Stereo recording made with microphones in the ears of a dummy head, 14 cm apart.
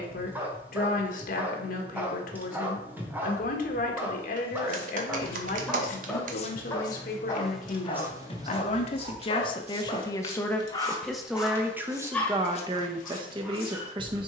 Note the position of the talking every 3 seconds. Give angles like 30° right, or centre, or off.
60° left, 60° left, 60° left, 10° left, 30° right.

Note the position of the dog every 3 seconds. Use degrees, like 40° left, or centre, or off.
10° right, 10° right, 30° left, 30° left, centre.